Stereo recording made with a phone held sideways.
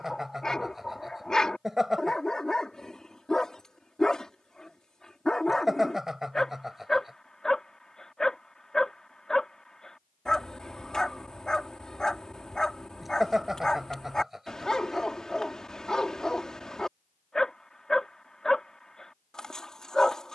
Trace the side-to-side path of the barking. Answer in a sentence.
You can hear the barking stay in one place.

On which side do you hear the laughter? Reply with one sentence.
In this clip you hear the laughter in the centre.